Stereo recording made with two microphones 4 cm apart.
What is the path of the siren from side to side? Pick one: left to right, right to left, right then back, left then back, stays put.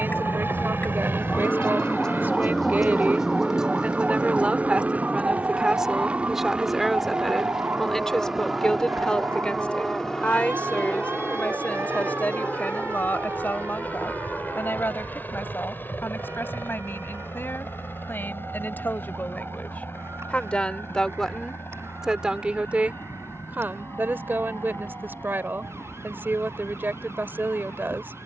left to right.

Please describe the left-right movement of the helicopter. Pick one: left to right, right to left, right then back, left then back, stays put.
right to left.